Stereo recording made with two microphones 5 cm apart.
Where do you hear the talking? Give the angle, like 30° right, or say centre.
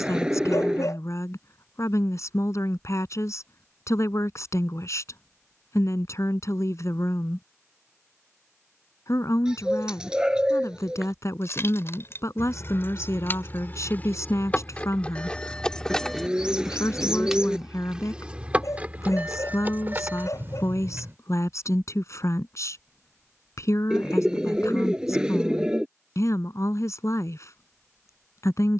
70° left.